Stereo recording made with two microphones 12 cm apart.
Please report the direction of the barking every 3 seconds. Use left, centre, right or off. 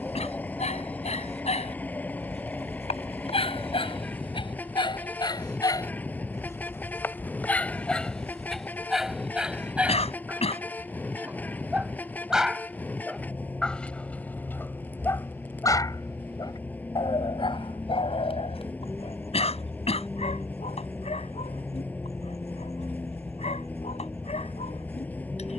left, left, centre, centre, centre, left, left, left, left.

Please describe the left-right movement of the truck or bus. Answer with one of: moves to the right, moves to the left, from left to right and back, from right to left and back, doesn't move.
doesn't move.